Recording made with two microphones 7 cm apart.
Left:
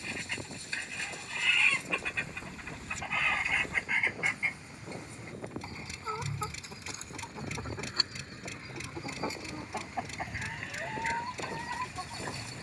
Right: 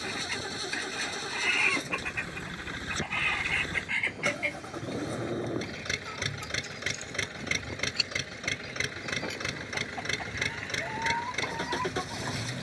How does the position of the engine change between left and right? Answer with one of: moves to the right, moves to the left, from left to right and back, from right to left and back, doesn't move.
doesn't move.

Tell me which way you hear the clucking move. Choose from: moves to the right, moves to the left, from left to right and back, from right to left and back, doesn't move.
from right to left and back.